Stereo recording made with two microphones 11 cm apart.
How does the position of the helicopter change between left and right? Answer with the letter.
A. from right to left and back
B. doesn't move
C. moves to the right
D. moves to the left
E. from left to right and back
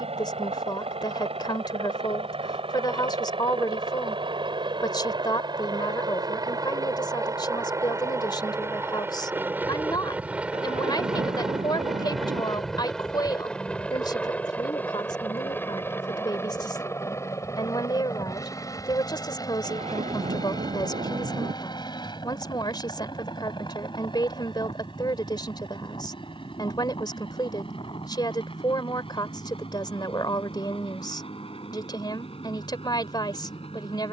D.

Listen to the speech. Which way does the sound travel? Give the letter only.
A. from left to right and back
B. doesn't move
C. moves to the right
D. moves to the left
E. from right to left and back
B.